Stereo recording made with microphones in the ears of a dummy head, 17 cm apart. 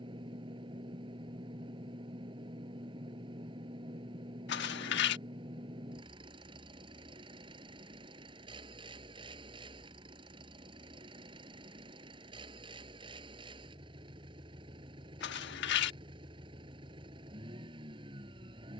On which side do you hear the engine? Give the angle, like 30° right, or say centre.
30° right.